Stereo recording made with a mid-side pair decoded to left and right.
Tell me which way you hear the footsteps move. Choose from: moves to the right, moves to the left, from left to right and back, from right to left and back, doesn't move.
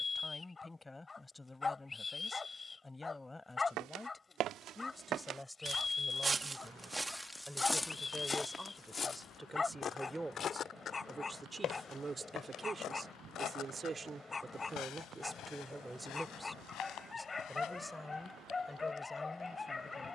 moves to the left.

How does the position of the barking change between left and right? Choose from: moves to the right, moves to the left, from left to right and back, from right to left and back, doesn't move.
doesn't move.